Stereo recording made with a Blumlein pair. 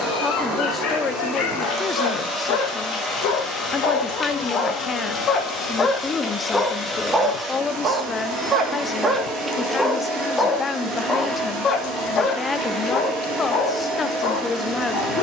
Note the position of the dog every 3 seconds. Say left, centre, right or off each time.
left, left, centre, centre, left.